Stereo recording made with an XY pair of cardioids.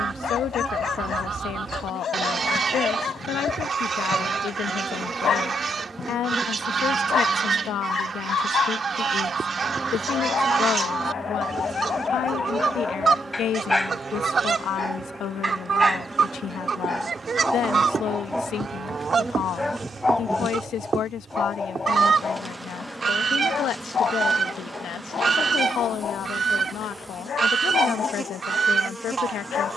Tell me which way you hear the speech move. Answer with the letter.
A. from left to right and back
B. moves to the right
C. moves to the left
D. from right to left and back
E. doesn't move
E.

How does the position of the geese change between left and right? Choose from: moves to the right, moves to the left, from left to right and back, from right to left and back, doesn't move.
doesn't move.